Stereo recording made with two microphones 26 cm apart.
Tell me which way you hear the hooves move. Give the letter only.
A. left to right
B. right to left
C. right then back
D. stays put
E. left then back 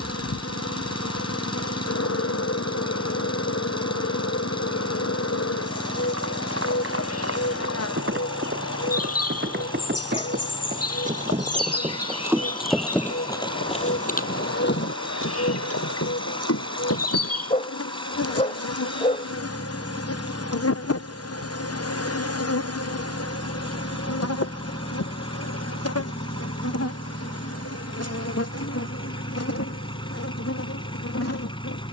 B.